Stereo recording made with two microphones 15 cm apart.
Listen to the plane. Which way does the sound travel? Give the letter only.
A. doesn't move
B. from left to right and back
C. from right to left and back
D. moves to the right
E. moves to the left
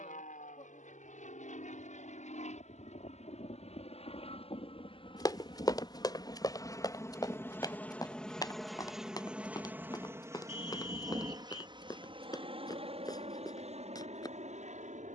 D.